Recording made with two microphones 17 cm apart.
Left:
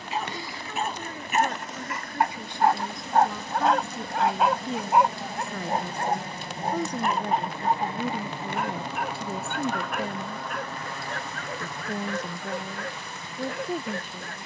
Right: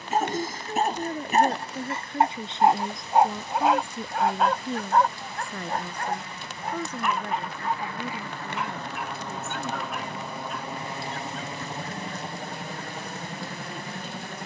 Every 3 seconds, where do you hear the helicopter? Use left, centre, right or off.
left, left, left, centre, right.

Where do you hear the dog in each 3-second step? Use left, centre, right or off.
right, centre, left, left, left.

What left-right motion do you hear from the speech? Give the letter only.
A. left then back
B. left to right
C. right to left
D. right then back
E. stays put
C.